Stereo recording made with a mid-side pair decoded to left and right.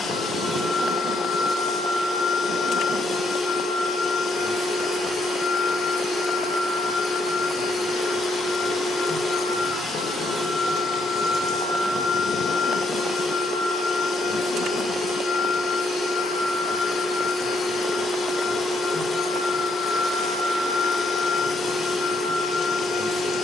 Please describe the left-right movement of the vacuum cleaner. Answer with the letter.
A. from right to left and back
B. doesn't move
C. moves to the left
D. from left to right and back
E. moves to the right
B.